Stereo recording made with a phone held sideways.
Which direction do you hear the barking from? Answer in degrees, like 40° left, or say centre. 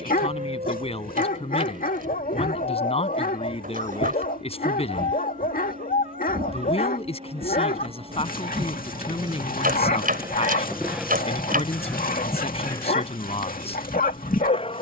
80° left.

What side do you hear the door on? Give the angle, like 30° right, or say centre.
80° right.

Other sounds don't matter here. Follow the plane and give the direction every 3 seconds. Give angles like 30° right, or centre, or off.
70° right, 60° right, 50° right, 10° right, 30° left.